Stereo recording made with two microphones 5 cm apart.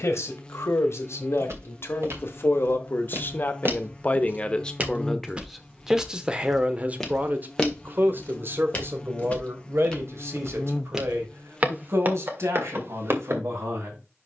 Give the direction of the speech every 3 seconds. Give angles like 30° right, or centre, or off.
60° left, 20° left, 40° right, 60° right, 70° right.